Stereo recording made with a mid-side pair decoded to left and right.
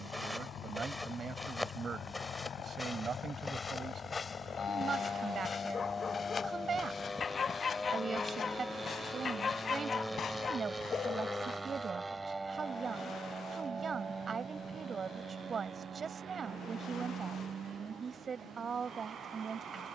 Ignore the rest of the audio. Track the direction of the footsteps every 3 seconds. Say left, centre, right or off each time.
centre, left, left, left, off, off, off.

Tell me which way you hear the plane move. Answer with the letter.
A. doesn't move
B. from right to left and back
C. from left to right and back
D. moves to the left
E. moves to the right
E.